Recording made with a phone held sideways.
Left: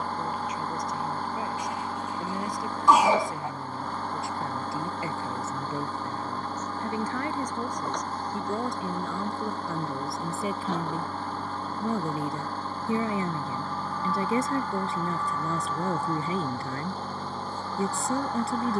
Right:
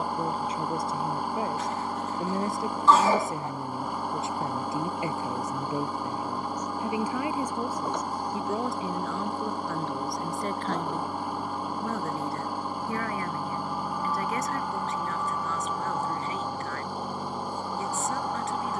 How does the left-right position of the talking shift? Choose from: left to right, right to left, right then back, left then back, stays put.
right to left.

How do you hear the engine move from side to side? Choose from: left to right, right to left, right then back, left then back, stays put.
stays put.